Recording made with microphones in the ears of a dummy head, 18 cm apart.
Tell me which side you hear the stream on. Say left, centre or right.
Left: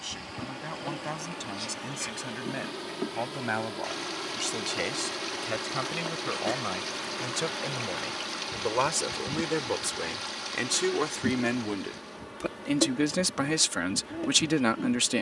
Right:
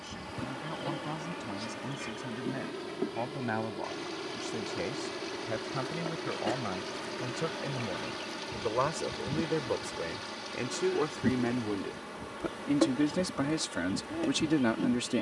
left.